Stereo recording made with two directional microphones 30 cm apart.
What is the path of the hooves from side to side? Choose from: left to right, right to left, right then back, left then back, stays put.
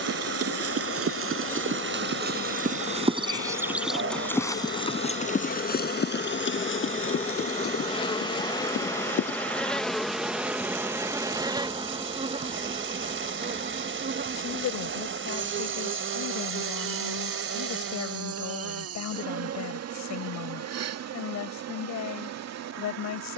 right to left.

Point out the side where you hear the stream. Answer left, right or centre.
right.